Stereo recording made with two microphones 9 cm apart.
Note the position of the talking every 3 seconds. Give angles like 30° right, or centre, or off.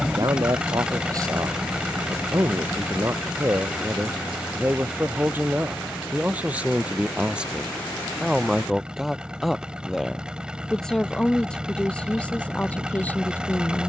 40° right, 30° right, 10° right, 10° left, 20° left.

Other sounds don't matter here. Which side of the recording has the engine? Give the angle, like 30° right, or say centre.
10° right.